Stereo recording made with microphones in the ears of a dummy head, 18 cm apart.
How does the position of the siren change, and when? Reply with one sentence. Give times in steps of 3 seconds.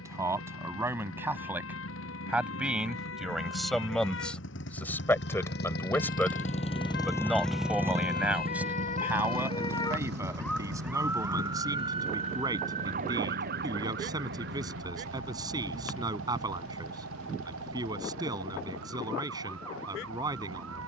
You can hear the siren on the left from 0 s, in the centre from 9 s and on the right from 12 s.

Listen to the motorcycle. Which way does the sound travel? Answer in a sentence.
You can hear the motorcycle move from left to right.